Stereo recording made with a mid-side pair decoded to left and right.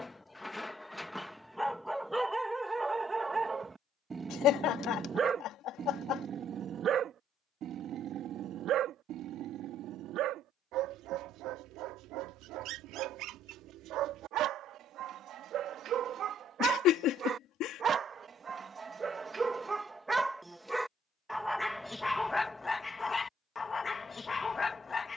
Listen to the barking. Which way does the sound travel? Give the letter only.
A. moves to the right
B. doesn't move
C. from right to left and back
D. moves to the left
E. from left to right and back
E.